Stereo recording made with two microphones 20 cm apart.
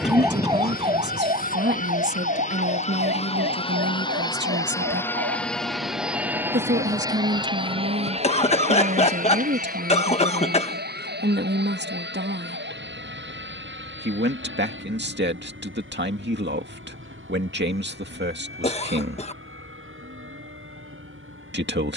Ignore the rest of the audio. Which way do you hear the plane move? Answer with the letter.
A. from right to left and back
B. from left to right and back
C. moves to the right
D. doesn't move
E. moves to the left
C.